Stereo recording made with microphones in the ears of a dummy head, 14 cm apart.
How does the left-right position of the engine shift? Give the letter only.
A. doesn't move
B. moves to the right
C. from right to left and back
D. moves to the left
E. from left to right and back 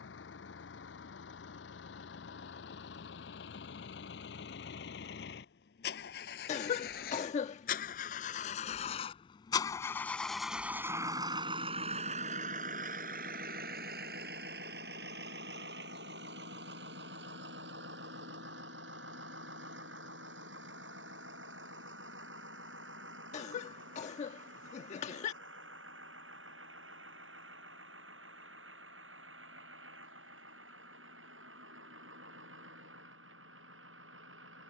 B.